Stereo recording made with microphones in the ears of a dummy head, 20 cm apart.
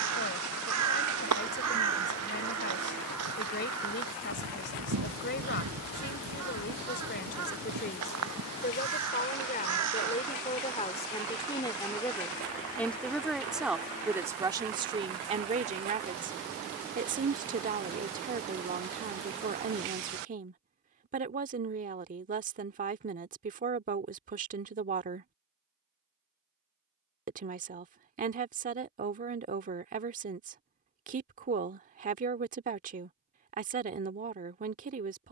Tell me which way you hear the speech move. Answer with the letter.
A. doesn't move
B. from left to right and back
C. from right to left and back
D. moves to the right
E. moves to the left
D.